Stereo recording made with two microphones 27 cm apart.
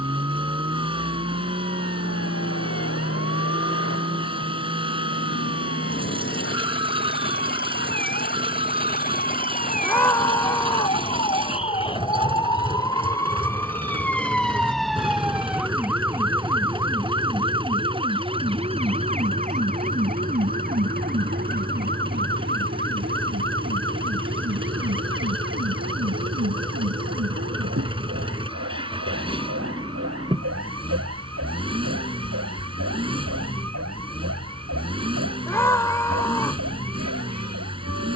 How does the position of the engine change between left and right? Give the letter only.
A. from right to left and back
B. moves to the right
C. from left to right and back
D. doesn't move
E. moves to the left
D.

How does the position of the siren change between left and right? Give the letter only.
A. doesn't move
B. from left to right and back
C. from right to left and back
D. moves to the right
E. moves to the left
D.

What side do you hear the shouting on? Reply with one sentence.
You can hear the shouting in the centre.